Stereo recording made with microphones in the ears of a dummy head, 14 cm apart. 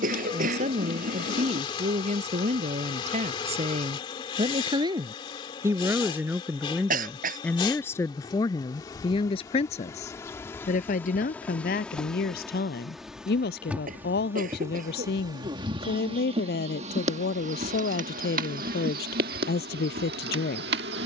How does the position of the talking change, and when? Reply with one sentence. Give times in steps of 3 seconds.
You can hear the talking on the right from 0 s, in the centre from 6 s and on the left from 9 s.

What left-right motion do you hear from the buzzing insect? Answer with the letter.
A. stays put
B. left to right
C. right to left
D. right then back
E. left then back
B.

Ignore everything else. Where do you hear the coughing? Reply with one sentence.
In this clip you hear the coughing on the right.